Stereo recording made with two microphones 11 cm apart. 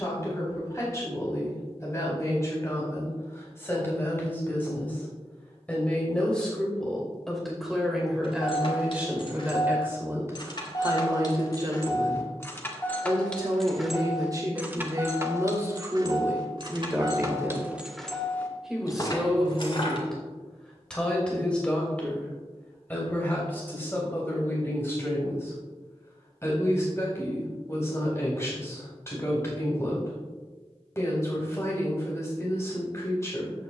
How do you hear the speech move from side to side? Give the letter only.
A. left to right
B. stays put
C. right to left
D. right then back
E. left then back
D.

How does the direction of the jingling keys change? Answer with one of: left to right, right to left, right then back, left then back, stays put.
right then back.